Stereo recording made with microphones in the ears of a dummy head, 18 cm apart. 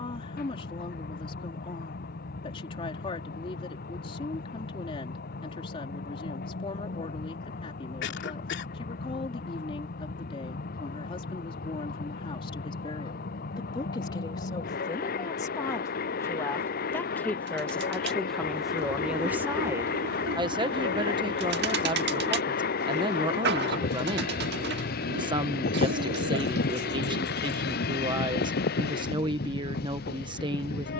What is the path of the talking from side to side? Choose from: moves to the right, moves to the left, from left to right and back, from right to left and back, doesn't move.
moves to the right.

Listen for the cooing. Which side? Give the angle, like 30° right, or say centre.
60° right.